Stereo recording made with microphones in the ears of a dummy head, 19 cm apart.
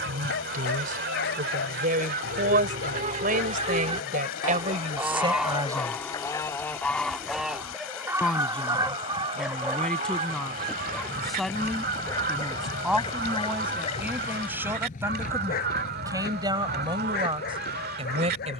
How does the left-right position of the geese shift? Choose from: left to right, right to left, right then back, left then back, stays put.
left then back.